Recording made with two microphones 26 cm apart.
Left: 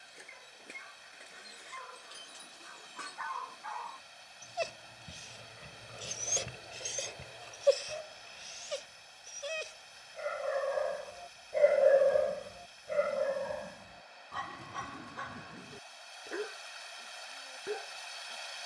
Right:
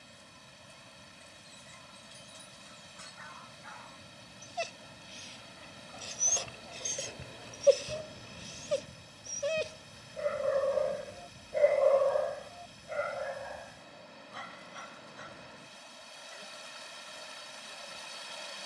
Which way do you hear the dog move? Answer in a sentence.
You can hear the dog move from left to right and back again.